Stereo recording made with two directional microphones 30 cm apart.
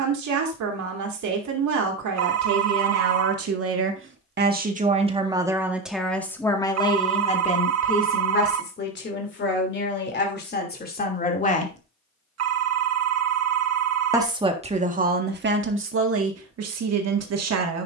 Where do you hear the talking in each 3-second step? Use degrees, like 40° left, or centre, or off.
70° right, 30° right, 20° left, 30° left, 20° right, 50° right.